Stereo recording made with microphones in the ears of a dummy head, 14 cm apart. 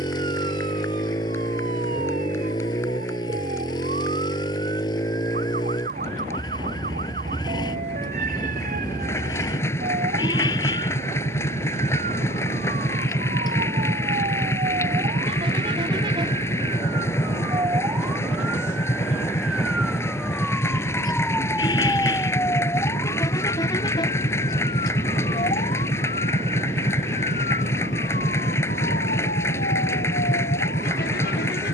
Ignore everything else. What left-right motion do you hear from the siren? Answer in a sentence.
In this clip you hear the siren go from the right side to the left.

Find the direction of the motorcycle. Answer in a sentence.
You can hear the motorcycle on the left.